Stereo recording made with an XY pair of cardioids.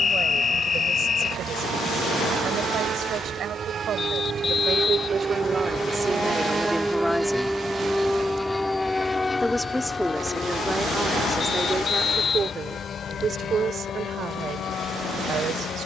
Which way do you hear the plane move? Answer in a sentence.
In this clip you hear the plane go from the right side to the left.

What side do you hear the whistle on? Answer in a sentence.
In this clip you hear the whistle on the left.